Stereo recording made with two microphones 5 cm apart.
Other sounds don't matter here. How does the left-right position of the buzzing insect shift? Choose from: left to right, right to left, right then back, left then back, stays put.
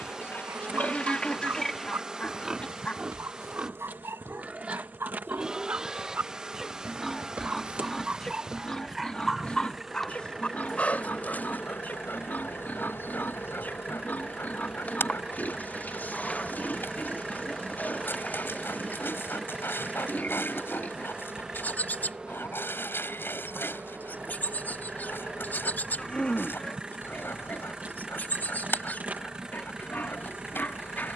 left then back.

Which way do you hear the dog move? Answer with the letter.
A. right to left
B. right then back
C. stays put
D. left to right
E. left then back
A.